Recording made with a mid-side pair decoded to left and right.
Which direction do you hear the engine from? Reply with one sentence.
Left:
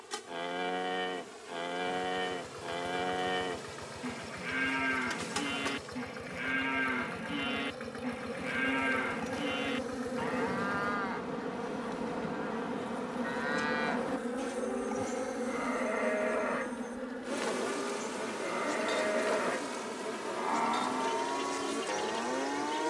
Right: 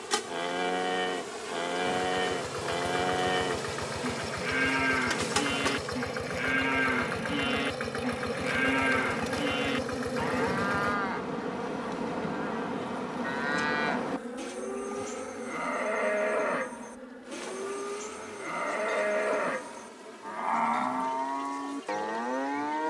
In this clip you hear the engine on the right.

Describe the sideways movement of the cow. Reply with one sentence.
In this clip you hear the cow stay in one place.